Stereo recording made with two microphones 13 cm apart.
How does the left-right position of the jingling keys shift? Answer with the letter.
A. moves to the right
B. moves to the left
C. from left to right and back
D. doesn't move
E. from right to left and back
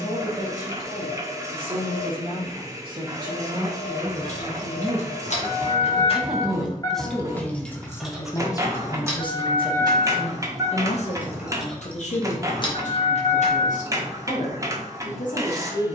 C.